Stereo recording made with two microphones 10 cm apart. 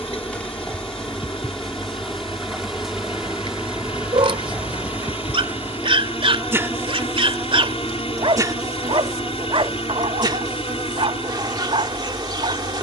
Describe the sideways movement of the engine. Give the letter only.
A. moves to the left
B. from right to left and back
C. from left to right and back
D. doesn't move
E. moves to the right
D.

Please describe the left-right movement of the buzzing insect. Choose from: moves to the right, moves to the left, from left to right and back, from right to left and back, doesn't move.
moves to the right.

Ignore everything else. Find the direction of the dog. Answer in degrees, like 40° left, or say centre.
60° right.